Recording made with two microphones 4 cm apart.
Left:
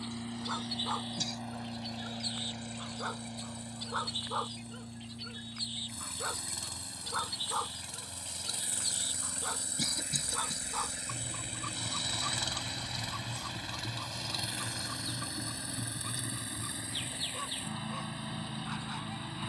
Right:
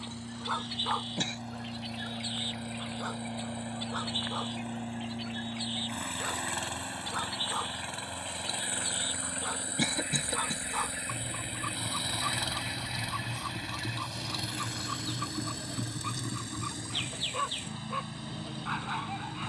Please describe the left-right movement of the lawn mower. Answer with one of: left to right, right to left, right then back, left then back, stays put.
right then back.